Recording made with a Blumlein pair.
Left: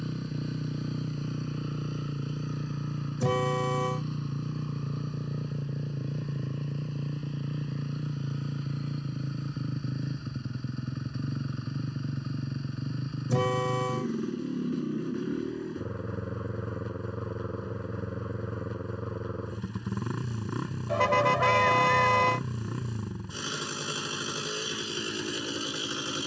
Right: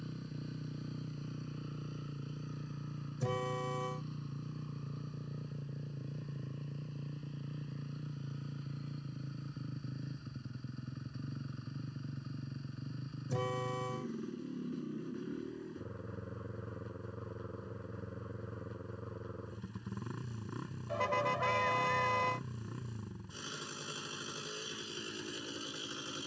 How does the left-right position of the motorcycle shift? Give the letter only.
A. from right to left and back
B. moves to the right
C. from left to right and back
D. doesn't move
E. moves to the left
D.